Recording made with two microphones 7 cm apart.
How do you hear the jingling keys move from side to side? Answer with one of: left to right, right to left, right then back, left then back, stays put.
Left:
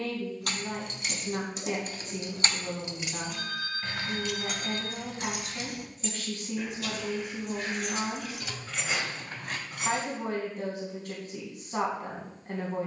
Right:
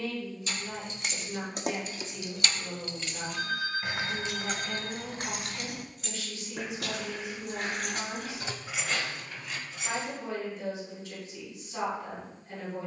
right then back.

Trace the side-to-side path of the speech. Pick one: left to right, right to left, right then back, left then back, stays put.
stays put.